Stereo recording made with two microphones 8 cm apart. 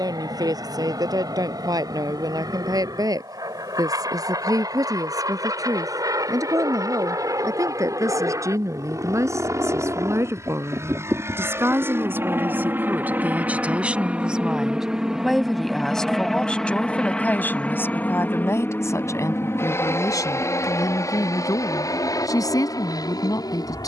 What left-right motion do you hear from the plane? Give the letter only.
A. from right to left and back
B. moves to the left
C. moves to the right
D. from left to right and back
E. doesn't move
B.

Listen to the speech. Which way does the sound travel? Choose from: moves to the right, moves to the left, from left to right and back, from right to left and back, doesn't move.
moves to the left.